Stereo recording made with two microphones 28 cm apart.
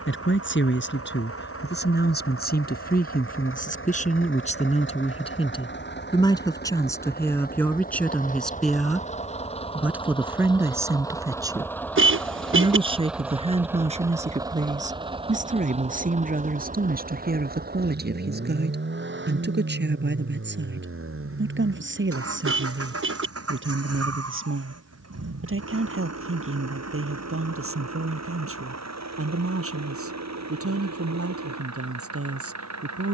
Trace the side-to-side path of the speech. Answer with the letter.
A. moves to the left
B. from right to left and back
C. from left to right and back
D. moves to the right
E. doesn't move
D.